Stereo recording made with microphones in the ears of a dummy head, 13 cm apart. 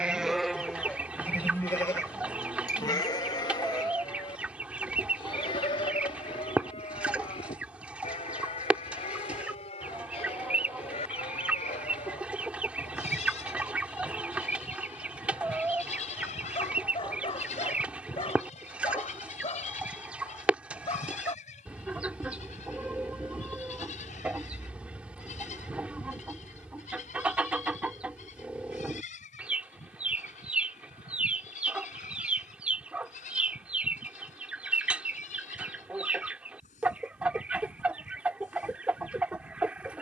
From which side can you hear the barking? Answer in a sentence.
You can hear the barking on the left.